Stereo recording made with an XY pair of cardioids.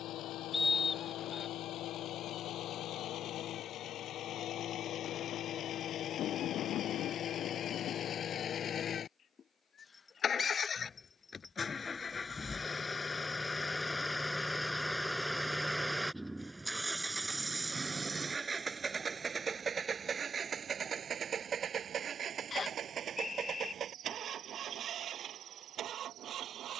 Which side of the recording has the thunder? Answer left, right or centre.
left.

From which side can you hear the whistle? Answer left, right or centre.
left.